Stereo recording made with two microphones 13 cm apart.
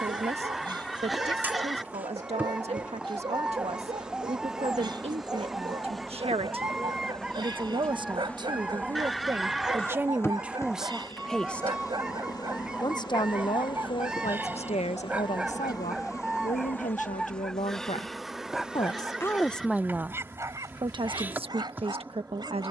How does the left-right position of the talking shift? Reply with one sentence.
You can hear the talking go left and come back.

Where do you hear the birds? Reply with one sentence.
In this clip you hear the birds in the centre.